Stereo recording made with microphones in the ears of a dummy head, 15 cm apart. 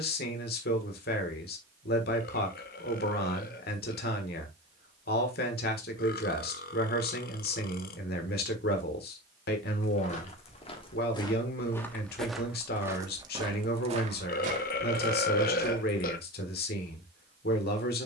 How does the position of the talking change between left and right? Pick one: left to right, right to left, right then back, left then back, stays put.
stays put.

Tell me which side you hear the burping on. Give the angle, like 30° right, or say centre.
50° left.